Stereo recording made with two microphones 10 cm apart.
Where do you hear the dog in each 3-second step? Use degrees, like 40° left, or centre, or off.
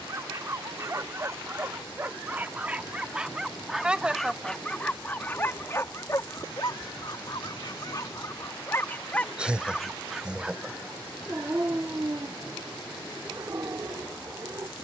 30° right, 10° left, 40° left, 10° right, 30° right.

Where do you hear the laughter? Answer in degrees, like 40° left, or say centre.
10° right.